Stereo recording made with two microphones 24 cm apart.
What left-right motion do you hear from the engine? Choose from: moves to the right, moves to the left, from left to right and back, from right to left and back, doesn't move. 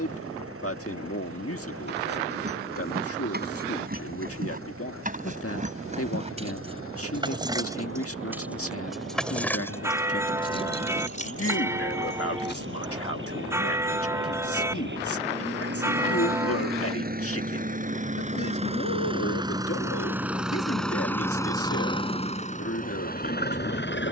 moves to the left.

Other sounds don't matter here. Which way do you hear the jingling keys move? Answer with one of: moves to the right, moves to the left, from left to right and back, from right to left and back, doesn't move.
moves to the left.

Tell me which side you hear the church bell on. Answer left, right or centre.
centre.